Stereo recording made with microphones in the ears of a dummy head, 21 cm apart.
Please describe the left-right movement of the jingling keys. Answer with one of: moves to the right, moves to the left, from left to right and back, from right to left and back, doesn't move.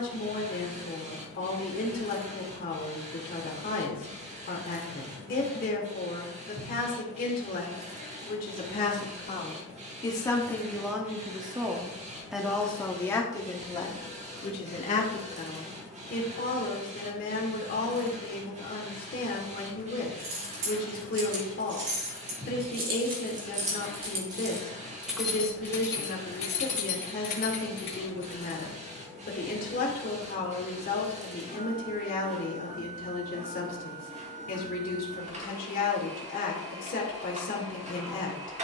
moves to the left.